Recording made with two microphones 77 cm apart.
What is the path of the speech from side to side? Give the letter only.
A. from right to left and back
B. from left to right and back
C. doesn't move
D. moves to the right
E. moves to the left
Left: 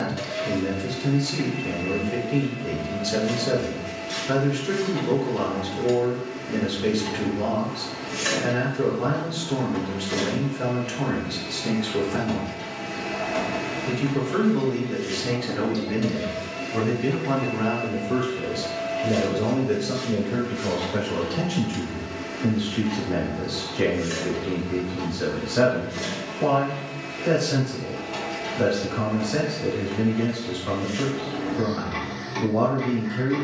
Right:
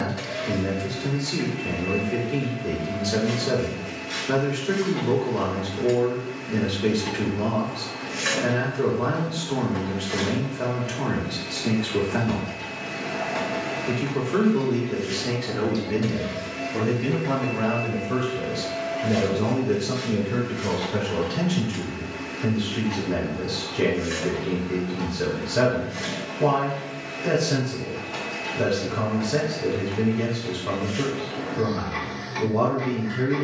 D.